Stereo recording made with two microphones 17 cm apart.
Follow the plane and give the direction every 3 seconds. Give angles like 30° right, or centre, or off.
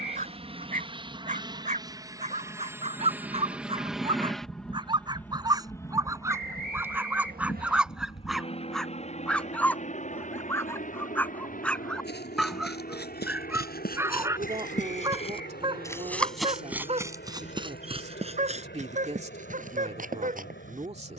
30° right, centre, 30° left, 40° left, 50° left, 60° left, 70° left.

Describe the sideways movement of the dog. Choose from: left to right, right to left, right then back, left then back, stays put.
left then back.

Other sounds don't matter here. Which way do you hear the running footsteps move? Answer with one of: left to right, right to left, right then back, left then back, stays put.
left to right.